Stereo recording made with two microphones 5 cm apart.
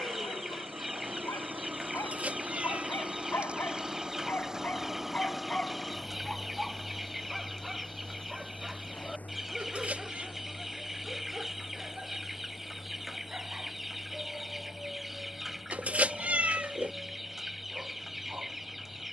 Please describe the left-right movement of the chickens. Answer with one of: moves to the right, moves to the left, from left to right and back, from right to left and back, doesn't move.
doesn't move.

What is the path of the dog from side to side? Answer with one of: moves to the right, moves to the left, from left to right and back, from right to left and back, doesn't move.
moves to the right.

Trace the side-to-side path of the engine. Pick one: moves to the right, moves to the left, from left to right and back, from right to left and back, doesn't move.
moves to the left.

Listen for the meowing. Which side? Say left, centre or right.
right.